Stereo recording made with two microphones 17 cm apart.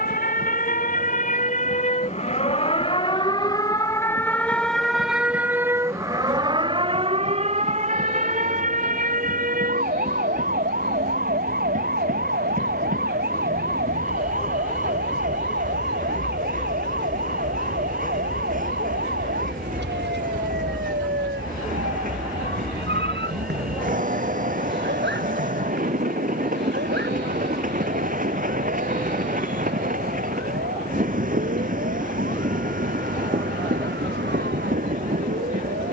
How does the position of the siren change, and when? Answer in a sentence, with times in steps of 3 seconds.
You can hear the siren on the left from 0 s, in the centre from 3 s and on the right from 6 s.